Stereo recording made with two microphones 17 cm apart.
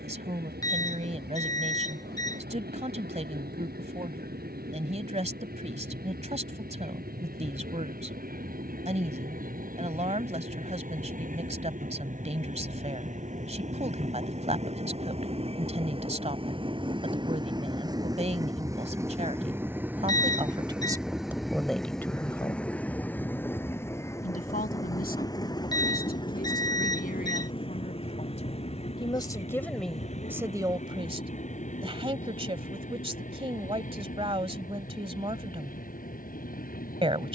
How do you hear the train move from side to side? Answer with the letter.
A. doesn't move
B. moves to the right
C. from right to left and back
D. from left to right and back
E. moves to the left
E.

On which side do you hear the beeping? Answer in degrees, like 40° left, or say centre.
20° left.